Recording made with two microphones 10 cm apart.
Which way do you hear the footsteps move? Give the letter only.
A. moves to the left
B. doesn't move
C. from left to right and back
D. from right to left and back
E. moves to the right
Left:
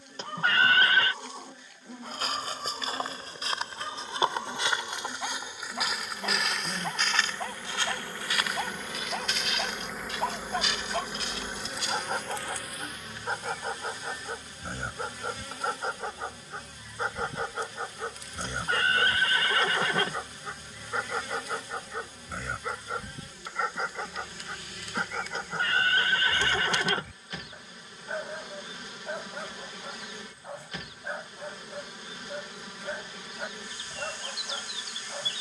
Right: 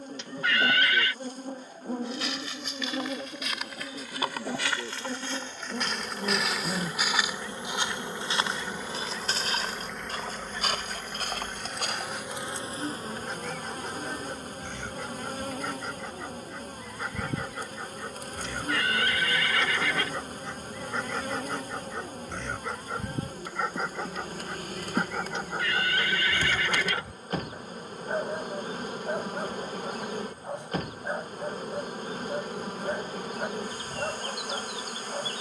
E.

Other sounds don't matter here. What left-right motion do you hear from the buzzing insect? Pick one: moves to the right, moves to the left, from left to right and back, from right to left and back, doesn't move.
from right to left and back.